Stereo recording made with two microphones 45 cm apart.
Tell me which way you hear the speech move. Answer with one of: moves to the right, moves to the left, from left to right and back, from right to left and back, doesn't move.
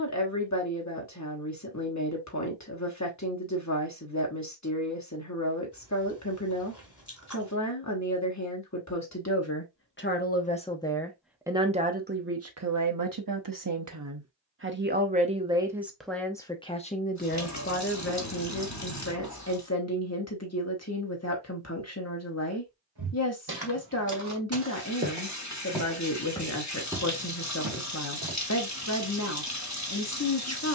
from left to right and back.